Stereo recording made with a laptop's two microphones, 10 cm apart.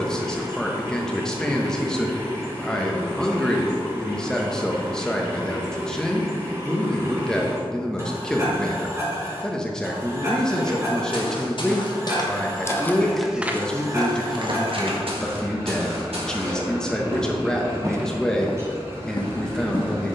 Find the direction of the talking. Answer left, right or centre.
centre.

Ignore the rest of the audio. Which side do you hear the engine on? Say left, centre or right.
right.